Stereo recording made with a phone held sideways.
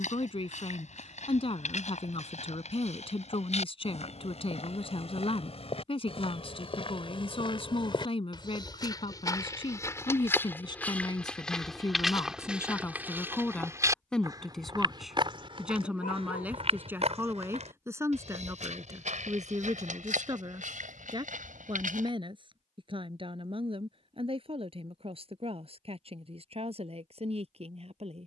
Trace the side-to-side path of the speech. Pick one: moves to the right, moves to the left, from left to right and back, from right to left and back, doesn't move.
moves to the right.